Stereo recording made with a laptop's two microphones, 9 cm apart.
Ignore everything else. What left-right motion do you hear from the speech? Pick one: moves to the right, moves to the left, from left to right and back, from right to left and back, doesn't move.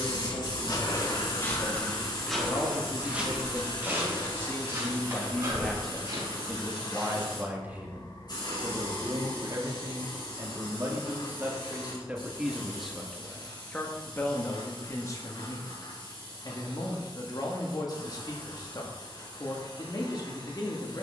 from left to right and back.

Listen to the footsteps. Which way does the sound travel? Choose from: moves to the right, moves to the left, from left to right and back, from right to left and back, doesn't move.
moves to the right.